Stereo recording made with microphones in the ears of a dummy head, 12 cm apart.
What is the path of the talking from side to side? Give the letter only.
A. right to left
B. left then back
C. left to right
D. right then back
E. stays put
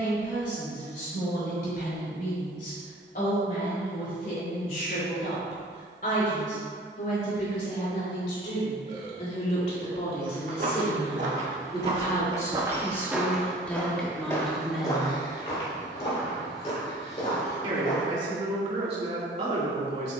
C.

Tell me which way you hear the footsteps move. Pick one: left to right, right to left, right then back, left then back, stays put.
right to left.